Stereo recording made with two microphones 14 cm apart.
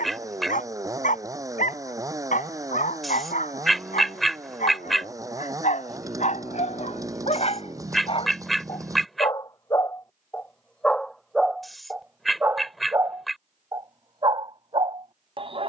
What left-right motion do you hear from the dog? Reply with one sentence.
You can hear the dog move to the right.